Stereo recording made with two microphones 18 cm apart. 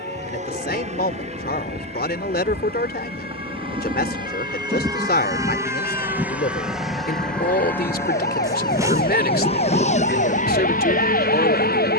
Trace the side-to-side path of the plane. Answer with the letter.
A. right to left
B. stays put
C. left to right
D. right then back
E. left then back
A.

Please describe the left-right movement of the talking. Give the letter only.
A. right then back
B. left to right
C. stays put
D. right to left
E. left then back
C.